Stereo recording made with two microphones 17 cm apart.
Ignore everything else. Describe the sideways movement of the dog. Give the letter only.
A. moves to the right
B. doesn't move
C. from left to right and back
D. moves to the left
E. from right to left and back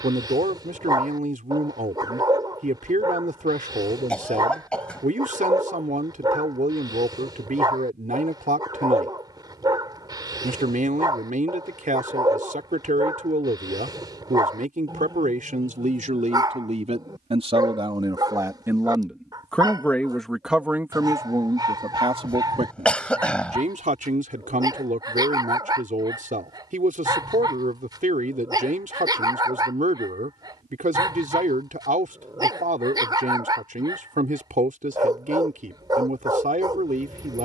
B.